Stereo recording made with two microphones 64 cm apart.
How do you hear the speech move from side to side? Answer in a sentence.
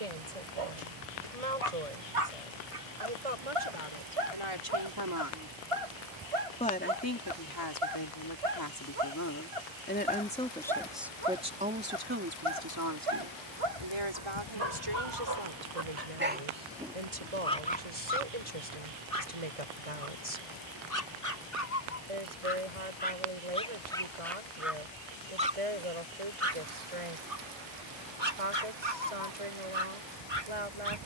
You can hear the speech go left and come back.